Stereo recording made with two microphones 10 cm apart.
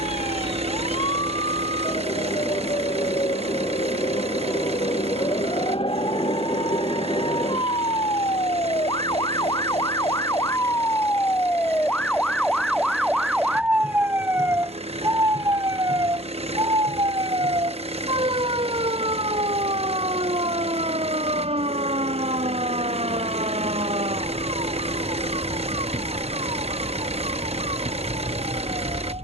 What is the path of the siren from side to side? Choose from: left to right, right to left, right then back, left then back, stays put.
left to right.